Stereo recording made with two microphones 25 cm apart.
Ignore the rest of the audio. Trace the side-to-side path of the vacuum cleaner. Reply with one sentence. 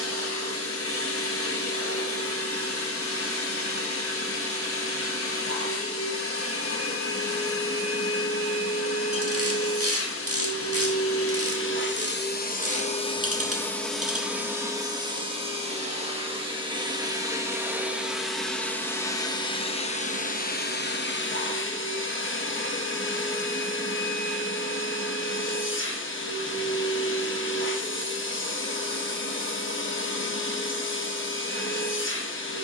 You can hear the vacuum cleaner move from left to right and back again.